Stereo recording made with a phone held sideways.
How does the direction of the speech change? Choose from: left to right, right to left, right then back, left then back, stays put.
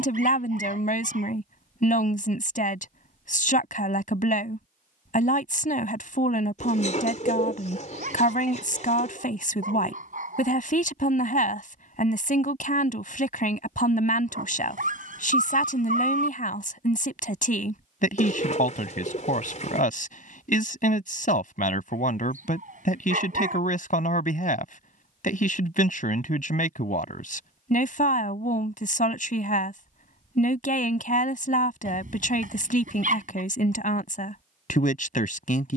stays put.